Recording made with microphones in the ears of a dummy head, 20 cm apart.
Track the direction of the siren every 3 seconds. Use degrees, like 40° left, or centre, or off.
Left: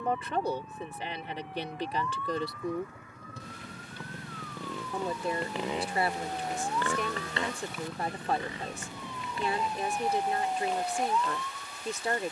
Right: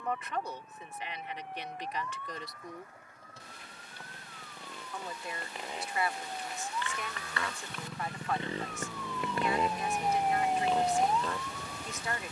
70° left, 60° left, 40° left, 20° right.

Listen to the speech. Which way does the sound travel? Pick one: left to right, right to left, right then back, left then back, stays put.
stays put.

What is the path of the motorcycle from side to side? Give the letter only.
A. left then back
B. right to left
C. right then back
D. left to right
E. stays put
D.